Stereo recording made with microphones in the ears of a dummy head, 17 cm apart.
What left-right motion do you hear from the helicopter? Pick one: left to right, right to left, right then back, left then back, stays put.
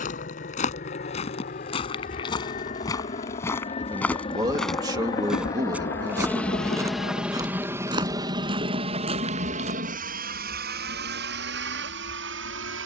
left to right.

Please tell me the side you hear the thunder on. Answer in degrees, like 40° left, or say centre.
60° left.